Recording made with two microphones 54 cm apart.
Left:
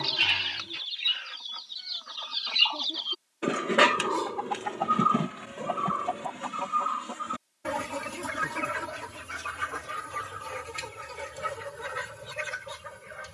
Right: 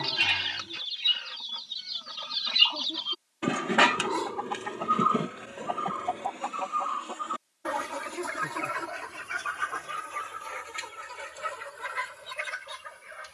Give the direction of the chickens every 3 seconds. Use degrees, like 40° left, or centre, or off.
50° right, centre, 50° left, 60° left, 60° left.